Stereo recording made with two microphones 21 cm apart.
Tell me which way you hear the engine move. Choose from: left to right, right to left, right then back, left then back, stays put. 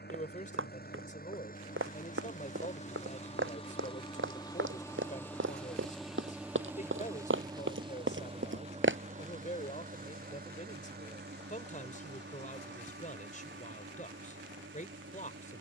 left to right.